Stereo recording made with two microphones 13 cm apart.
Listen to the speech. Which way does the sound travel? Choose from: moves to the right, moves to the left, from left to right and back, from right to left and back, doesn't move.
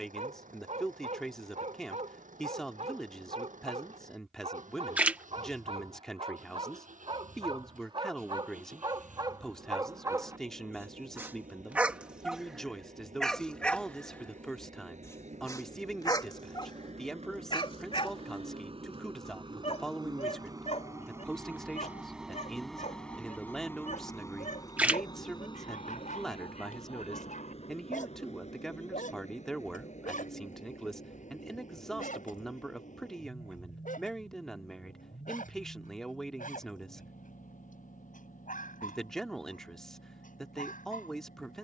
doesn't move.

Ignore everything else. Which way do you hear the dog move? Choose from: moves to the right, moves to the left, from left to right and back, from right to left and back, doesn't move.
moves to the left.